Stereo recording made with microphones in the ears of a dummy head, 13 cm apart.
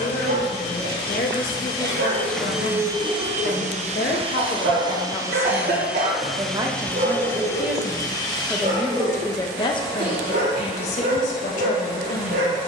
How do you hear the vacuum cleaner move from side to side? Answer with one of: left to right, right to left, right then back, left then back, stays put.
right then back.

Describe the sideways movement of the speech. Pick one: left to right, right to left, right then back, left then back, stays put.
right then back.